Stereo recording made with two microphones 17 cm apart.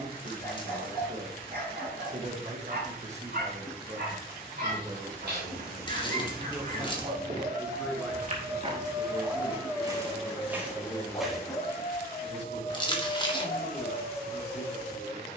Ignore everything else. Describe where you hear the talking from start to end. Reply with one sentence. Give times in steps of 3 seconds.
You can hear the talking on the right from 0 s, in the centre from 6 s and on the left from 9 s.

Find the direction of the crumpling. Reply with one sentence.
In this clip you hear the crumpling on the left.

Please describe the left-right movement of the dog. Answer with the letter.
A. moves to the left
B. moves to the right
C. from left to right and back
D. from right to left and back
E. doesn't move
A.